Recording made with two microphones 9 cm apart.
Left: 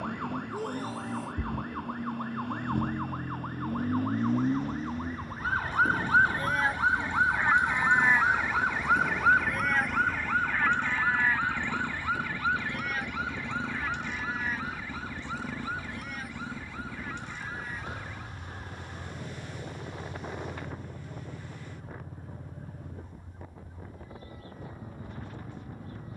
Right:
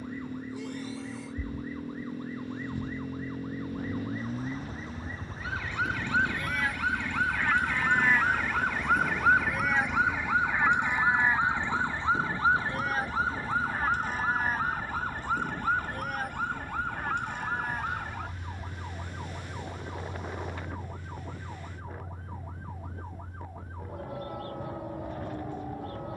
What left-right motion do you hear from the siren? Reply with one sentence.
You can hear the siren move to the right.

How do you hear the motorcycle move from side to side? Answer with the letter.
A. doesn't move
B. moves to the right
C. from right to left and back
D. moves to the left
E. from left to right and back
D.